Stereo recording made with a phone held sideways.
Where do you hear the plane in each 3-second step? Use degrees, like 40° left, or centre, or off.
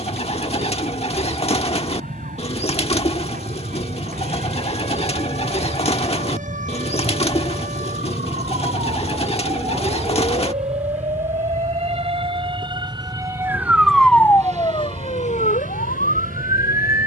50° left, 40° left, 20° left, 10° right, 40° right, 60° right.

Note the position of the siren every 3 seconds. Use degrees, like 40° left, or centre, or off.
70° right, 60° right, 60° right, 50° right, 10° right, 70° left.